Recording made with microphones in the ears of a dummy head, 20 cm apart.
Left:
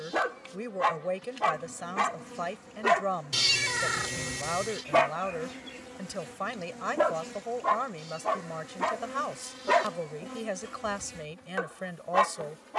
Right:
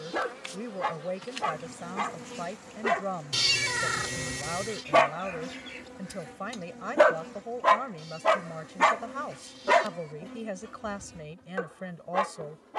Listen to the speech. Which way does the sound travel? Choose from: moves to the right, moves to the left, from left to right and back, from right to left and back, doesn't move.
doesn't move.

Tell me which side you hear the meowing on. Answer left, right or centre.
centre.